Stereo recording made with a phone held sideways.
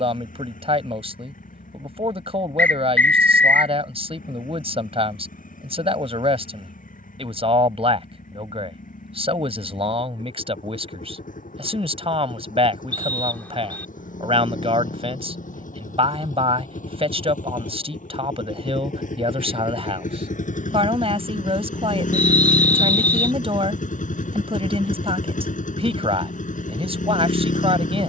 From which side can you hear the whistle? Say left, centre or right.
centre.